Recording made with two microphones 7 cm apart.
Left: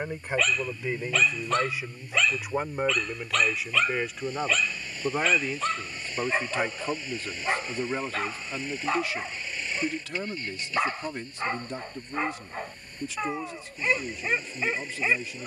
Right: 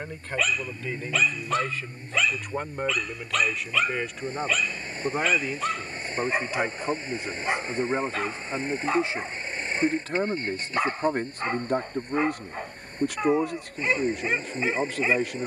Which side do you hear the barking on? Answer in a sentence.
In this clip you hear the barking in the centre.